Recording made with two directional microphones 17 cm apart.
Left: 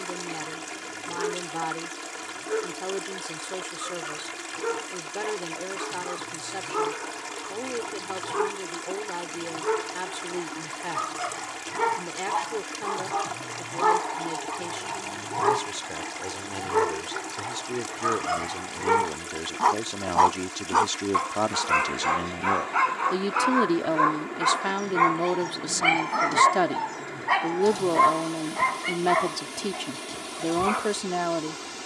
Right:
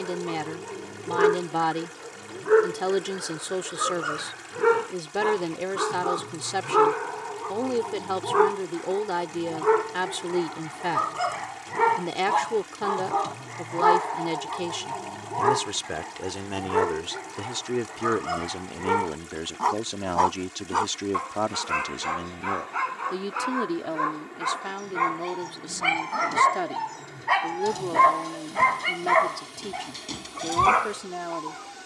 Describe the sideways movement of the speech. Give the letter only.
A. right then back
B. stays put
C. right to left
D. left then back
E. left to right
C.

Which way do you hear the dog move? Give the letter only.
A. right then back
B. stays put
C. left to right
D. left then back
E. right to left
D.